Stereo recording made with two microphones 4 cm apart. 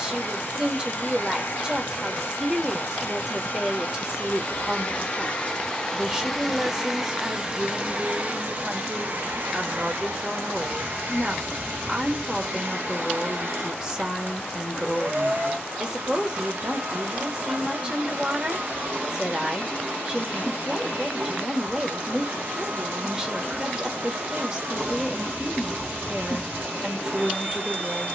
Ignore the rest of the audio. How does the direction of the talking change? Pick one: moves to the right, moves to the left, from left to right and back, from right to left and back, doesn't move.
doesn't move.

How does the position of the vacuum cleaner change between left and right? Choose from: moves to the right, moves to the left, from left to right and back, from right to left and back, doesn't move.
moves to the right.